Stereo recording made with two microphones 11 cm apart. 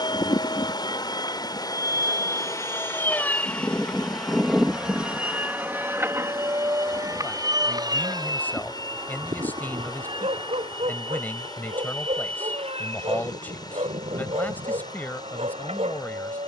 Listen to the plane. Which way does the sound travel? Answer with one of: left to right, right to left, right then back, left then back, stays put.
left to right.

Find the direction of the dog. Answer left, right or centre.
right.